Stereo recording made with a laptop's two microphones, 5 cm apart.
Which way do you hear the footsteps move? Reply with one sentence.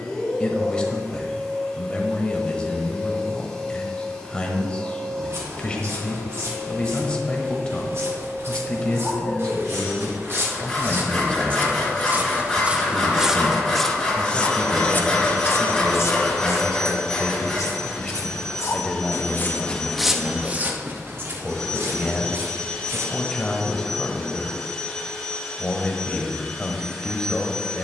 In this clip you hear the footsteps move from right to left and back again.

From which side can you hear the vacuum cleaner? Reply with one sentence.
In this clip you hear the vacuum cleaner in the centre.